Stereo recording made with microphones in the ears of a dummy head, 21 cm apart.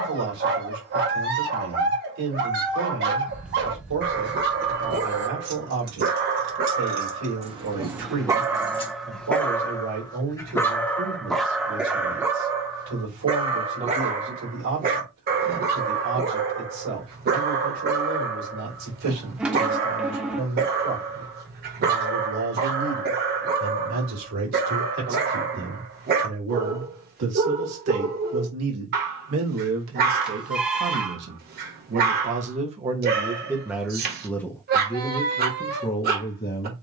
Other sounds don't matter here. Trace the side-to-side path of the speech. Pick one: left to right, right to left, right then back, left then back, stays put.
right to left.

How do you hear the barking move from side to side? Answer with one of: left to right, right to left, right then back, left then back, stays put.
left then back.